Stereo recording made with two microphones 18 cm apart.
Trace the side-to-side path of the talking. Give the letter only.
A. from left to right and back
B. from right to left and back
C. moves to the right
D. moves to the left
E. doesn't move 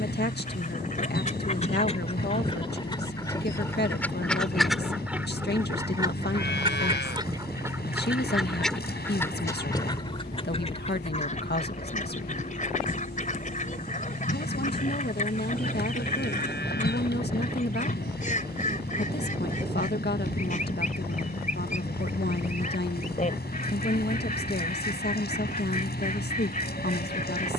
E.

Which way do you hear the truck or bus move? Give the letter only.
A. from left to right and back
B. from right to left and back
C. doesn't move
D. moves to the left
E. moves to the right
C.